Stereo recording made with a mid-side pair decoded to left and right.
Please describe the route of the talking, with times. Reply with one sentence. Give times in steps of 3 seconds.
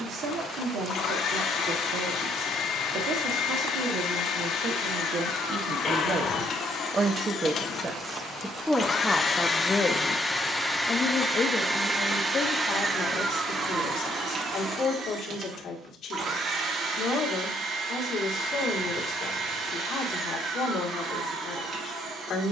You can hear the talking on the right from 0 s and on the left from 9 s.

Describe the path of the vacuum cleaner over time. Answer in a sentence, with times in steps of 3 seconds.
You can hear the vacuum cleaner on the left from 0 s, in the centre from 9 s and on the right from 12 s.